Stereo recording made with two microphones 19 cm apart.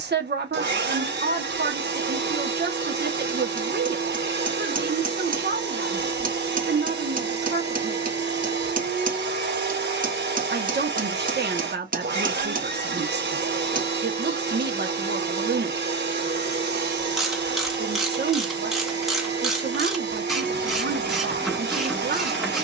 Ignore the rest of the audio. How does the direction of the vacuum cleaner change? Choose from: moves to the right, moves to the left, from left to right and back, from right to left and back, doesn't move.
doesn't move.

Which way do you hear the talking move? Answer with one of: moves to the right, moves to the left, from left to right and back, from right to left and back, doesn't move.
doesn't move.